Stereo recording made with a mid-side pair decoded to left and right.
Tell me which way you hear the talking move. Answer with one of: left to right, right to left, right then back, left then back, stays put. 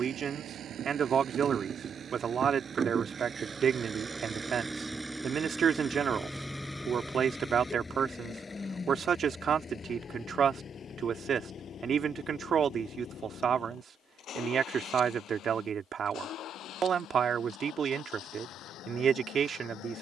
stays put.